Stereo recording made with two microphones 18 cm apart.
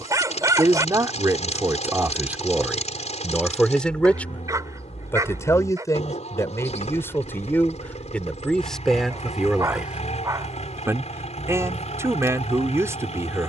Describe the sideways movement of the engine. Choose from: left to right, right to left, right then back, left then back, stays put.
stays put.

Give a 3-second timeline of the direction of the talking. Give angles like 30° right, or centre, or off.
10° right, 10° left, 10° left, 10° right, 20° right.